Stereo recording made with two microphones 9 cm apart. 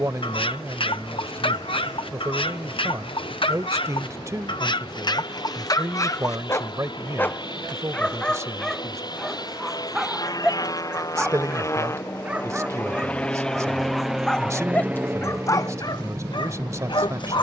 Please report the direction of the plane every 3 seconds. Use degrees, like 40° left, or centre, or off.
80° left, 70° left, 60° left, 50° left, 10° left, 30° right.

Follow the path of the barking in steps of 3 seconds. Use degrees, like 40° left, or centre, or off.
70° left, 60° left, 20° left, 10° right, centre, 50° left.